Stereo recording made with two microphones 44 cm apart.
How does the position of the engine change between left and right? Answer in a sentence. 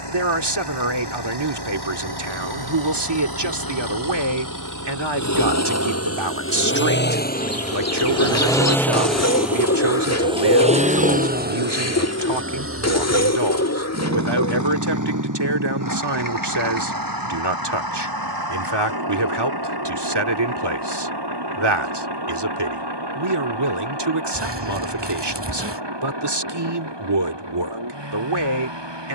In this clip you hear the engine travel towards the right.